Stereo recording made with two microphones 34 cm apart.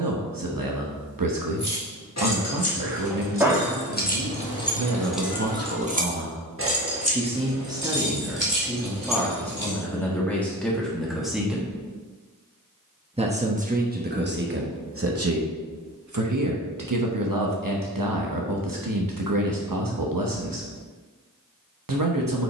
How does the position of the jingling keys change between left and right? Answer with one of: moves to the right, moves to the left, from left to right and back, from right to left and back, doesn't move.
moves to the right.